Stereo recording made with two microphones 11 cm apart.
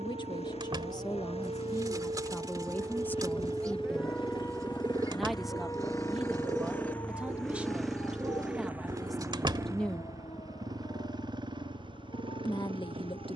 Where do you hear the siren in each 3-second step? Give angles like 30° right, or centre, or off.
50° right, 10° left, 40° left, 50° left, 60° left.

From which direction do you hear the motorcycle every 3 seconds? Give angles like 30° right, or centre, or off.
70° left, 40° left, centre, 30° right, 50° right.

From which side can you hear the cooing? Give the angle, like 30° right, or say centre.
30° right.